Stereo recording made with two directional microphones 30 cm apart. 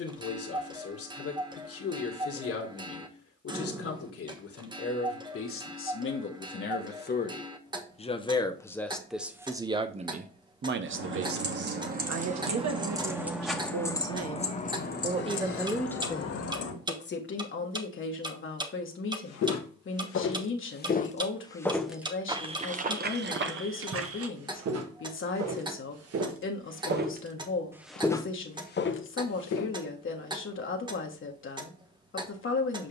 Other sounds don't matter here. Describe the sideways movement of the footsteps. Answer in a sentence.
You can hear the footsteps go right and come back.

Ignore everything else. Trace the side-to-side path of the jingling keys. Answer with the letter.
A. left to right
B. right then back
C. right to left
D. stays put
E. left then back
C.